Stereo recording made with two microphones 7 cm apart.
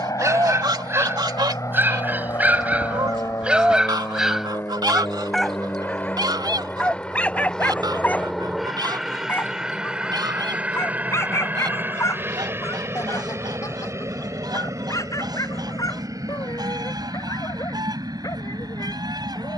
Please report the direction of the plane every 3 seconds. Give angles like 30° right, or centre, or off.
50° left, 40° left, 10° left, 10° right, 30° right, 50° right, 50° right.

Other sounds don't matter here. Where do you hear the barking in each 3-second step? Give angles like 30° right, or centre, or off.
30° right, centre, 20° left, 40° left, 40° left, 50° left, 60° left.